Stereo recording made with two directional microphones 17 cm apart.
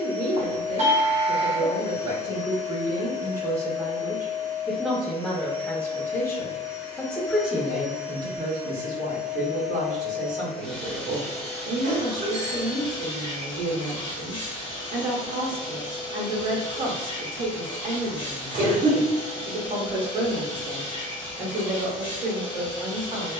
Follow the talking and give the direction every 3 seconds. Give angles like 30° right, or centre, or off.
40° right, 10° right, 10° right, 50° right, 50° right, 50° right, 50° right, 50° right.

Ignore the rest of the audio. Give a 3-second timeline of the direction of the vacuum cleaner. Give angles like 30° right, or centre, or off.
30° left, 30° left, 10° left, centre, 30° left, 30° left, 30° left, 30° left.